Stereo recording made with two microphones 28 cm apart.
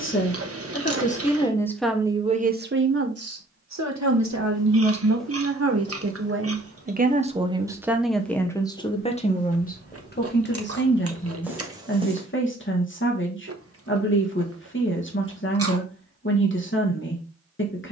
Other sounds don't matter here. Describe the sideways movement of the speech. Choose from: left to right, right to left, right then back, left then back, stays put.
right then back.